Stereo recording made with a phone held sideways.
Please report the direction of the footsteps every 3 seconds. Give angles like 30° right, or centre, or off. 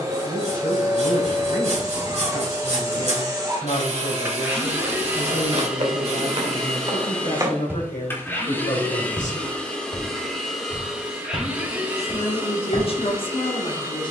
off, 60° right, 30° right, 40° left, 60° left.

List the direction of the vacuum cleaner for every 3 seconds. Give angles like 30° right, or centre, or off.
30° right, 20° right, 10° left, centre, 20° right.